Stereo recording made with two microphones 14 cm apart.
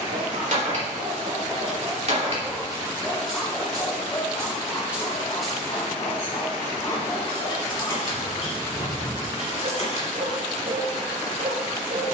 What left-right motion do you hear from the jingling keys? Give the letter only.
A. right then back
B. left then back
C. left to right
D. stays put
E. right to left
E.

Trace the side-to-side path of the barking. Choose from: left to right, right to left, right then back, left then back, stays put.
left then back.